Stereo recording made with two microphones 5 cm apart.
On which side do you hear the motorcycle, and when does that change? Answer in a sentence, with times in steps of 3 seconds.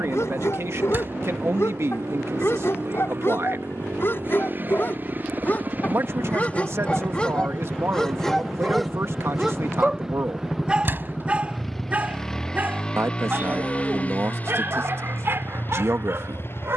You can hear the motorcycle on the right from 0 s, in the centre from 9 s and on the left from 12 s.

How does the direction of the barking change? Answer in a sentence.
In this clip you hear the barking move from left to right.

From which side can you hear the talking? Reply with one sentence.
You can hear the talking on the right.